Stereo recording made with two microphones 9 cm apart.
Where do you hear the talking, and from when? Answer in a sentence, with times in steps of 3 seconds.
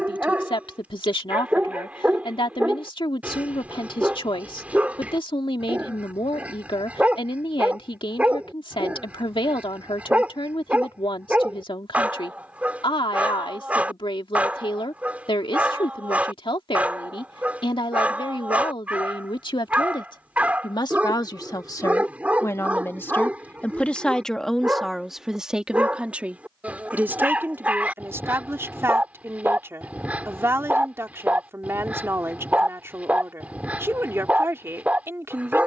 You can hear the talking on the left from 0 s, in the centre from 24 s and on the right from 27 s.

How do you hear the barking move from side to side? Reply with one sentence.
You can hear the barking stay in one place.